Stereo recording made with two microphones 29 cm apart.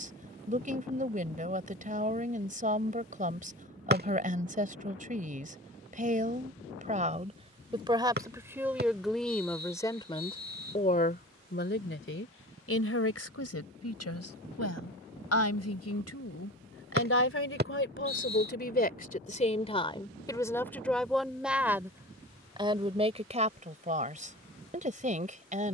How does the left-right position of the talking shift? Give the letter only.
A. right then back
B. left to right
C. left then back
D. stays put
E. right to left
C.